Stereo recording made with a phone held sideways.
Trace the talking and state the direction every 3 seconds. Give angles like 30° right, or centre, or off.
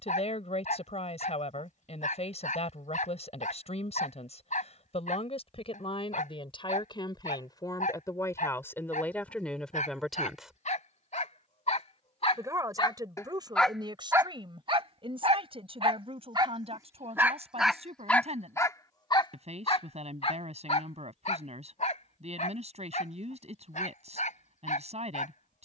50° left, 50° left, 30° left, centre, 30° right, 50° right, 50° right, 50° right, 50° right.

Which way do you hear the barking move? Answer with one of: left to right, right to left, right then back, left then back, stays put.
right then back.